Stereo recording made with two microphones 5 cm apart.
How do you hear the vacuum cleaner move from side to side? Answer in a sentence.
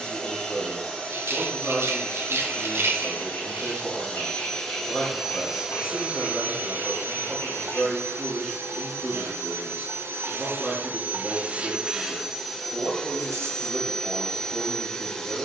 You can hear the vacuum cleaner go right and come back.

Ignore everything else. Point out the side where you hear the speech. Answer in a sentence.
You can hear the speech in the centre.